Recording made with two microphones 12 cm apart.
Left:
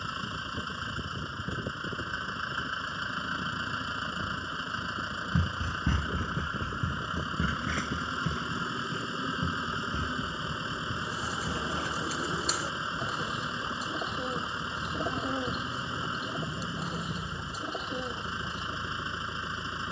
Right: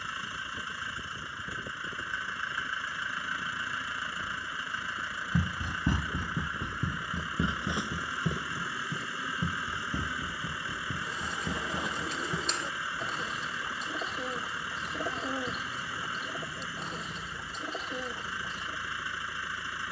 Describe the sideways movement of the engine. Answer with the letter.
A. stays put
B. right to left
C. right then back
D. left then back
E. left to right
A.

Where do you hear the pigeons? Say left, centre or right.
centre.